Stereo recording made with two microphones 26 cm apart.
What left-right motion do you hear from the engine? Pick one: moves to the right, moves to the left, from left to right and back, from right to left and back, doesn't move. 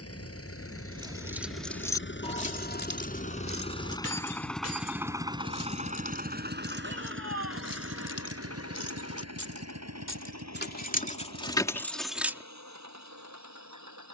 moves to the right.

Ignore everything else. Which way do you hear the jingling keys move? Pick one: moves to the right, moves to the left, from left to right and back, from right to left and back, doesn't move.
from right to left and back.